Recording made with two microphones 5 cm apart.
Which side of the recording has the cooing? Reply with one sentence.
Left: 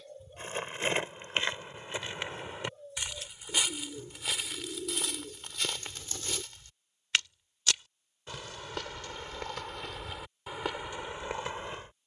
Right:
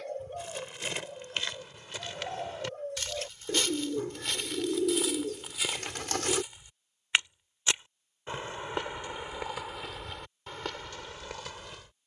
In this clip you hear the cooing on the right.